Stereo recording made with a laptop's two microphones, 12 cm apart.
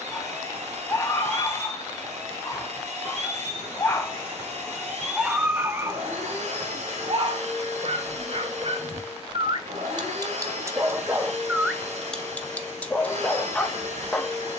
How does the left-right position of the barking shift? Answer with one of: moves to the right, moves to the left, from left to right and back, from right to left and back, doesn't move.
from left to right and back.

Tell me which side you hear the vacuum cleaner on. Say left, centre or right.
right.